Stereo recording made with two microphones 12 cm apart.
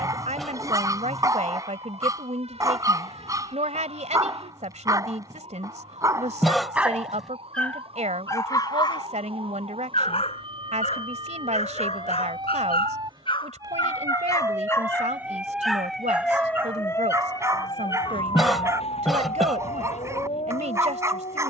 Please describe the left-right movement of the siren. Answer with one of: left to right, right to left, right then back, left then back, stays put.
right to left.